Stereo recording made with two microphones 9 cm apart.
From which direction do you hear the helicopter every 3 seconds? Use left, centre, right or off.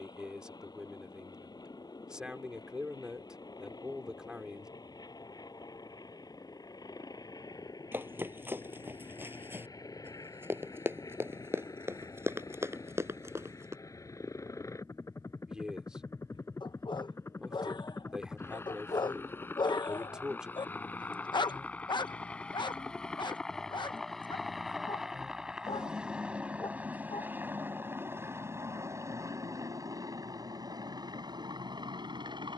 left, left, left, left, left, left, left, centre, centre, right, right.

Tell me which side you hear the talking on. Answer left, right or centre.
centre.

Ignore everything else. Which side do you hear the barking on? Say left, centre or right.
left.